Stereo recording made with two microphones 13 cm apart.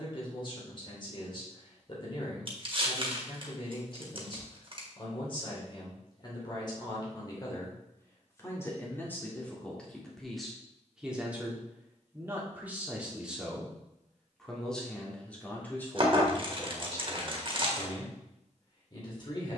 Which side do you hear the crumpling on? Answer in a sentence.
You can hear the crumpling on the right.